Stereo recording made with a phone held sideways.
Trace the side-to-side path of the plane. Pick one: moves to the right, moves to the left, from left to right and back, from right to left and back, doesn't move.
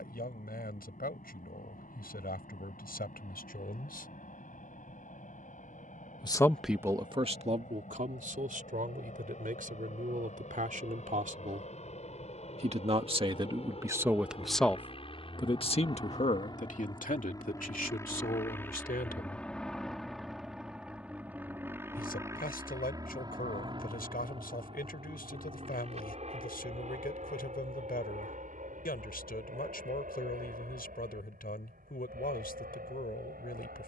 moves to the right.